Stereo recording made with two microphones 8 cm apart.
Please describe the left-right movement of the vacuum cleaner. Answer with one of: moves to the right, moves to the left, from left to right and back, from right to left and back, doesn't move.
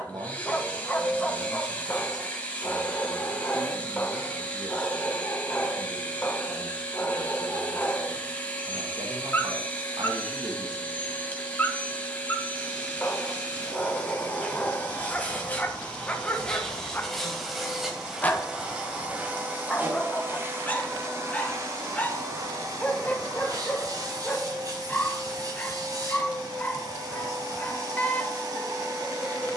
moves to the right.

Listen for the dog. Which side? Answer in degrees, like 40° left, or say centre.
20° left.